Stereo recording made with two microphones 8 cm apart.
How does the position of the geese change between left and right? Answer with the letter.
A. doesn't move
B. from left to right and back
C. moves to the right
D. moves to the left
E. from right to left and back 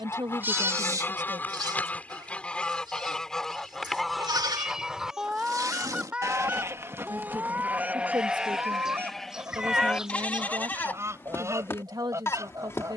C.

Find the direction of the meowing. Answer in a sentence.
You can hear the meowing in the centre.